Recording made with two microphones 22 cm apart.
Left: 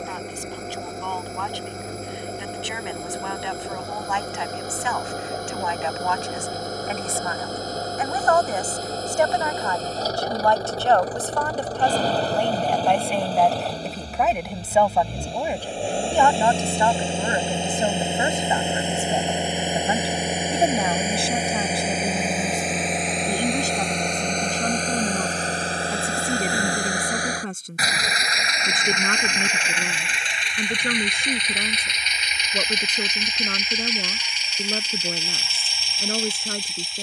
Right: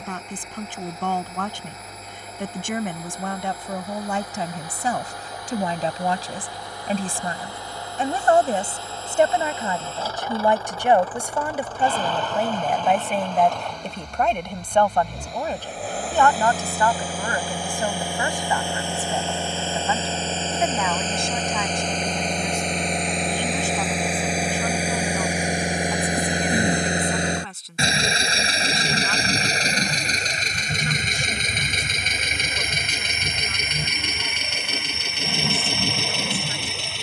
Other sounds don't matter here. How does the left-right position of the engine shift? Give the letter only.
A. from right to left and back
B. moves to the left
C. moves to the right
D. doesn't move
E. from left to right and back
C.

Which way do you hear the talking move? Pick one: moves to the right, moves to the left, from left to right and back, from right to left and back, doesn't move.
moves to the left.